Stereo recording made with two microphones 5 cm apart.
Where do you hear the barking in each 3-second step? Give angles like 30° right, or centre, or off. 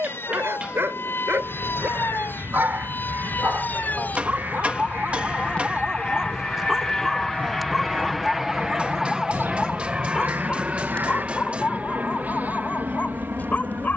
50° right, 30° right, centre, 20° left, 40° left.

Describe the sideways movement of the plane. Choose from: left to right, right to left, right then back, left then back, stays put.
left to right.